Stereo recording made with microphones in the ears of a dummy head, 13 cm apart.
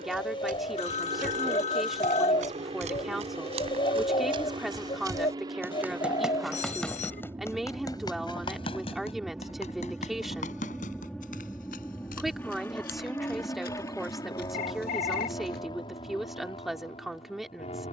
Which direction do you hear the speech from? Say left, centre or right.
centre.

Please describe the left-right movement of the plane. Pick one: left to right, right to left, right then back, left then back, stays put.
right to left.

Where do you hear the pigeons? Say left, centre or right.
left.